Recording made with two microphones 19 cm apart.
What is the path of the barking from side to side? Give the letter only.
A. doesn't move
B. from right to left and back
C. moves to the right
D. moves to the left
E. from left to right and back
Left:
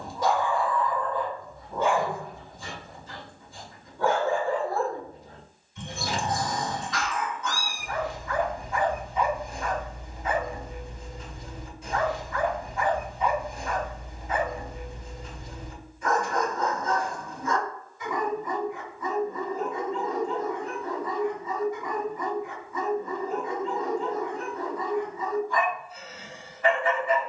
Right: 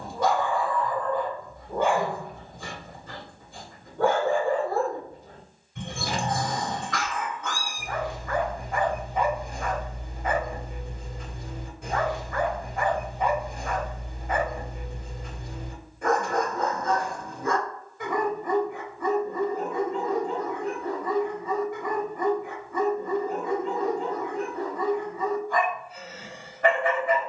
A.